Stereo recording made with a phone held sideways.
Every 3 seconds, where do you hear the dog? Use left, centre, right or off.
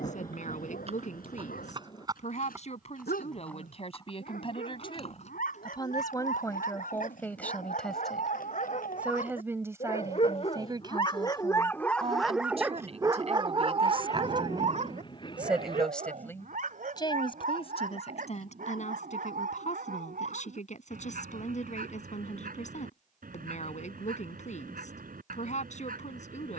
left, left, left, left, right, right, right, right, right.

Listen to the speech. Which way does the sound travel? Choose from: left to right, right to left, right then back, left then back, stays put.
right then back.